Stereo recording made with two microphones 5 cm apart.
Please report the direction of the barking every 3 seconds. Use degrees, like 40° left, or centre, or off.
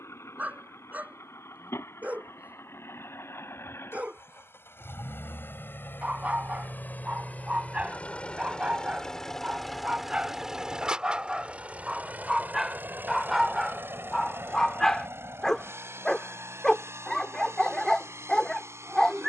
30° right, 30° right, 30° right, 20° right, centre, 10° left, 10° left.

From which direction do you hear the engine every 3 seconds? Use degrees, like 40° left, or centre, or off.
70° left, 60° left, 30° left, 10° right, 50° right, 60° right, 70° right.